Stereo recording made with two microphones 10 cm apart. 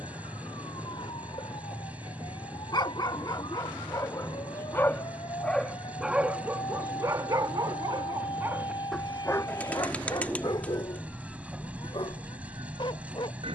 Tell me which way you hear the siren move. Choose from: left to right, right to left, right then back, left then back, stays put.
left to right.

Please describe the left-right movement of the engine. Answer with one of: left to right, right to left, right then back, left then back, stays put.
stays put.